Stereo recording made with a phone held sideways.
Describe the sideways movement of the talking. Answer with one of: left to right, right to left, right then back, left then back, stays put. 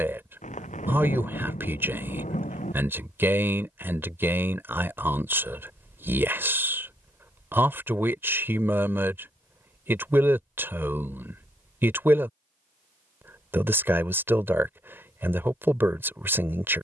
stays put.